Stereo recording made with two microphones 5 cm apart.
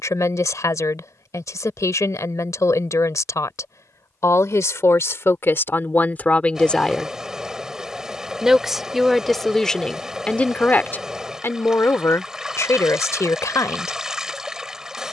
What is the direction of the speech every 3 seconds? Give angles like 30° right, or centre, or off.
70° left, 60° left, 10° left, 30° left, 70° left.